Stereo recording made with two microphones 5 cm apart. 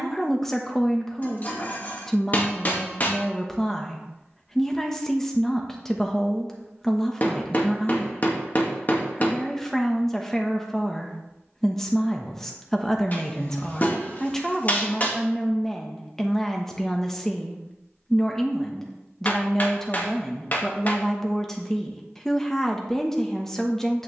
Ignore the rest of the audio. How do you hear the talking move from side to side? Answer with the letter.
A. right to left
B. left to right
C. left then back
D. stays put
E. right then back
D.